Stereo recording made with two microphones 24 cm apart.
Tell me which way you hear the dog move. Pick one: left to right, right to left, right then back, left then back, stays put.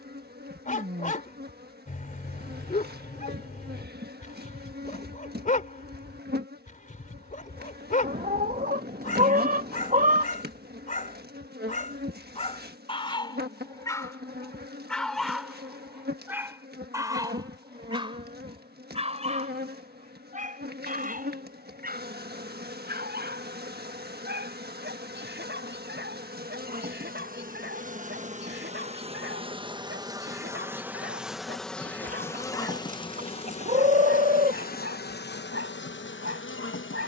left to right.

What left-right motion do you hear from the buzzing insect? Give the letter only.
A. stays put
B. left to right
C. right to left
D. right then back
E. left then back
C.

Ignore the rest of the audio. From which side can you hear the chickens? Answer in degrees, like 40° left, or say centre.
30° right.